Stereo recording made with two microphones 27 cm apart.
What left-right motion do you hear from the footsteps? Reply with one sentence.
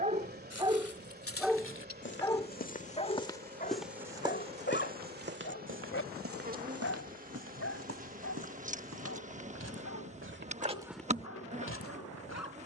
You can hear the footsteps go right and come back.